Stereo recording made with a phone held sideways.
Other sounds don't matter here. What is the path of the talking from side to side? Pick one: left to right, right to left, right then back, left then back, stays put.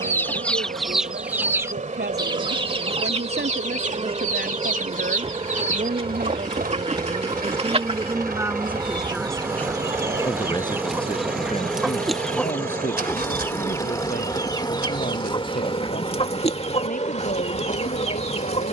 right to left.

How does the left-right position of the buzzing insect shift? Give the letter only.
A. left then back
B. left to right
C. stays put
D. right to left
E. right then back
D.